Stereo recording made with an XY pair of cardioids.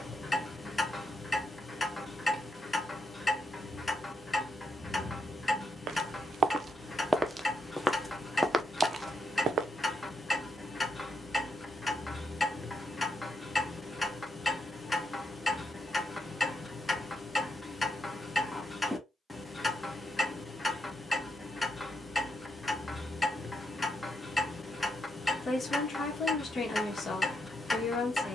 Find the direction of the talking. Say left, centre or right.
left.